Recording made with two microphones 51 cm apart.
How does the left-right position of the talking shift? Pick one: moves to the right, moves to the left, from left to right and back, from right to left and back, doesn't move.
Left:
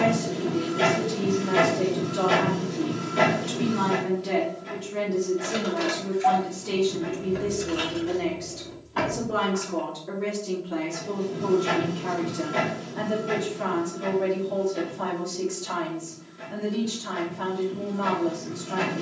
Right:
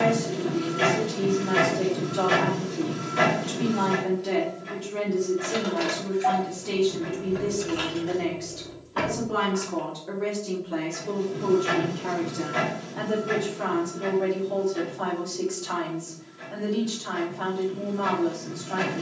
from left to right and back.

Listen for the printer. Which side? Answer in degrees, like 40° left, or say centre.
60° left.